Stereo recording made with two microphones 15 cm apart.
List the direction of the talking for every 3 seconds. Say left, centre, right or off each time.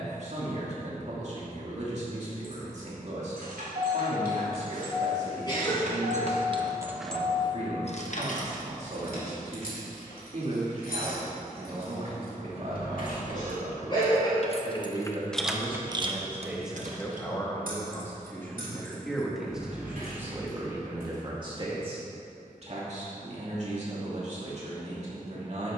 right, right, right, right, right, centre, centre, right, right.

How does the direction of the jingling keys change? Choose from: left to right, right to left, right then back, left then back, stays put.
left then back.